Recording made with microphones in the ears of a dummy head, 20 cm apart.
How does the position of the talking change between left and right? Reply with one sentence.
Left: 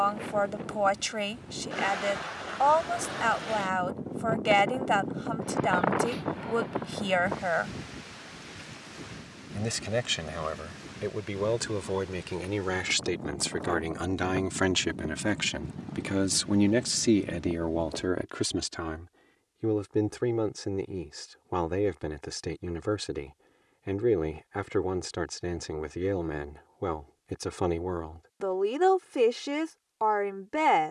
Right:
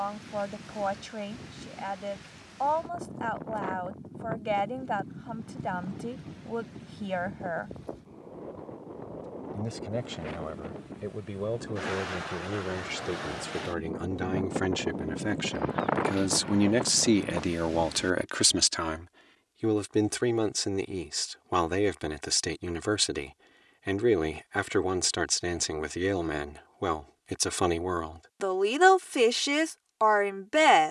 You can hear the talking travel towards the right.